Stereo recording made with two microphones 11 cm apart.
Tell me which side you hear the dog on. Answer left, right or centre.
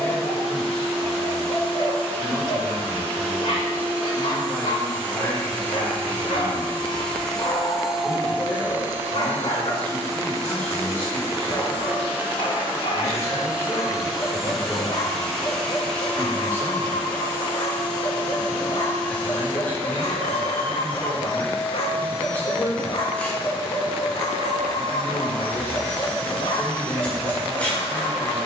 left.